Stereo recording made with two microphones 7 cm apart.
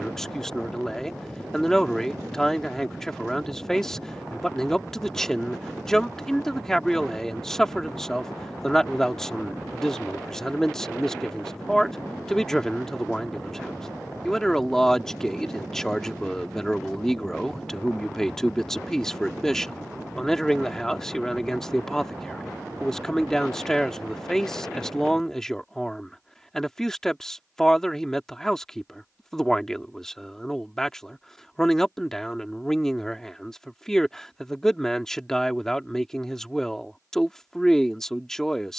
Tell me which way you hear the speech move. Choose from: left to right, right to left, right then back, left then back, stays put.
stays put.